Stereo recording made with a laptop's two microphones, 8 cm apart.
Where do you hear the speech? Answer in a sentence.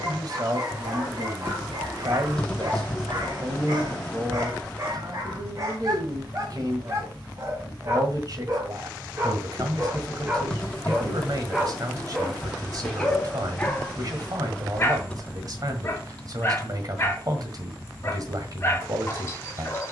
You can hear the speech on the right.